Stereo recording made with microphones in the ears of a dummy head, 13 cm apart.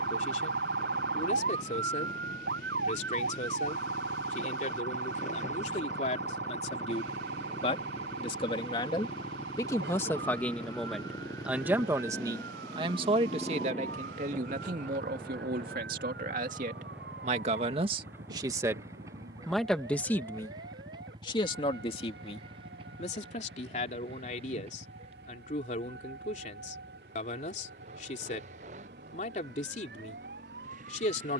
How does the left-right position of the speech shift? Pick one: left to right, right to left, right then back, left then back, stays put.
right then back.